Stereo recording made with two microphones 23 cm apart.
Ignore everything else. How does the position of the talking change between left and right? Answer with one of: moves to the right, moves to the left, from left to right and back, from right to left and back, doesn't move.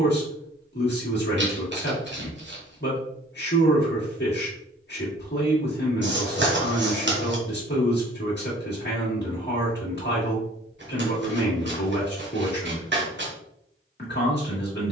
doesn't move.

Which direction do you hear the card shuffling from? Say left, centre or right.
right.